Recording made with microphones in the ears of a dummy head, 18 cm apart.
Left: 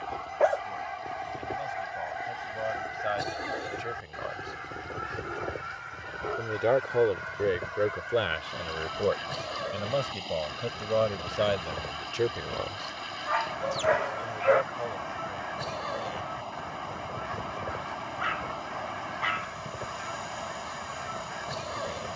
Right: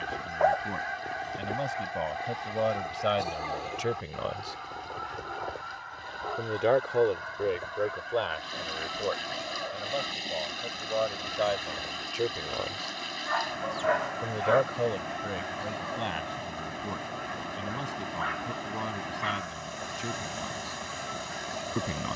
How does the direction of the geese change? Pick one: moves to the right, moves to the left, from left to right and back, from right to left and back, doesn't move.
moves to the left.